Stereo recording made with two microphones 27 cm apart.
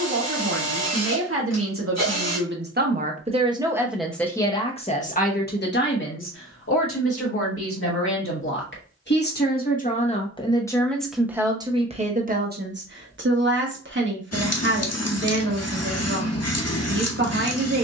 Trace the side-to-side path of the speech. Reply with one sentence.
In this clip you hear the speech go left and come back.